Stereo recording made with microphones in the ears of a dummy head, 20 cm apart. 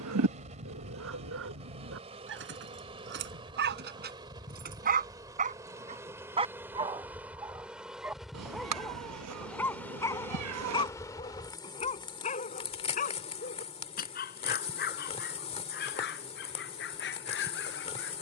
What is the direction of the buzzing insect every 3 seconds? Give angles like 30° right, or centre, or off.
30° right, 20° right, 10° right, 10° left, 30° left, 30° left.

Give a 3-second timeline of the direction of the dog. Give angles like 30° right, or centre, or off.
60° right, 40° right, 10° right, 20° left, 40° left, 50° left.